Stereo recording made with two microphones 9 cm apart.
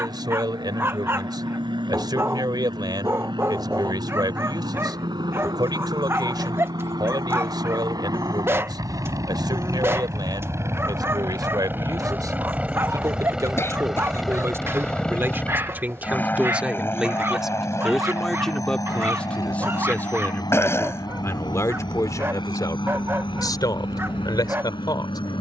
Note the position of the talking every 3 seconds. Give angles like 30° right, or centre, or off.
50° right, 50° right, 50° right, 50° right, 40° right, 20° right, 10° left, 40° left, 50° left.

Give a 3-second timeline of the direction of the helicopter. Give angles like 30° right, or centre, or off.
70° right, 60° right, 50° right, 30° right, 10° right, 20° left, 40° left, 50° left, 60° left.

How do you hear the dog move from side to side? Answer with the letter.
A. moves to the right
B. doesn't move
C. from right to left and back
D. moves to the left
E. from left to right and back
B.